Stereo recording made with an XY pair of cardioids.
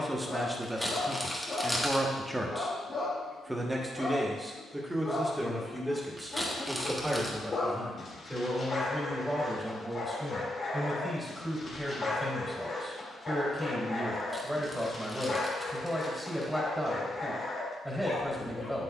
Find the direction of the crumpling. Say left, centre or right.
centre.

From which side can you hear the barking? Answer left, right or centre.
left.